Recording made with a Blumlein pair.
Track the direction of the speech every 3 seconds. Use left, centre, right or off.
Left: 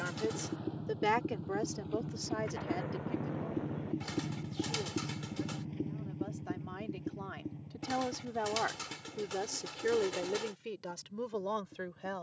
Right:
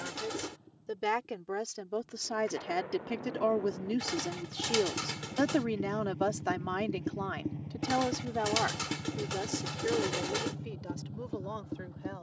centre, right, right, centre.